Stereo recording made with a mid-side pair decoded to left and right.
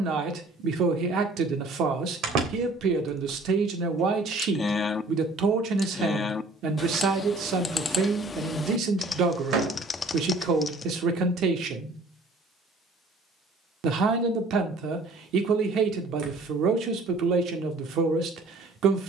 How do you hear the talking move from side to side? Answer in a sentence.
In this clip you hear the talking stay put.